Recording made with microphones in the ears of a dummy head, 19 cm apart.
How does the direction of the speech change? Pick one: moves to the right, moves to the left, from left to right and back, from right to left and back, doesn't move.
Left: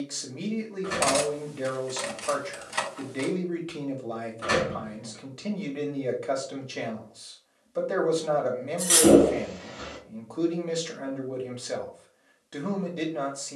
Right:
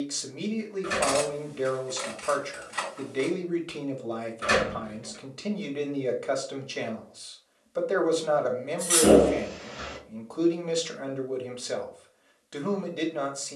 doesn't move.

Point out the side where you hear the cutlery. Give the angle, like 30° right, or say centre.
50° left.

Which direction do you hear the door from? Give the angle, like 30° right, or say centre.
10° right.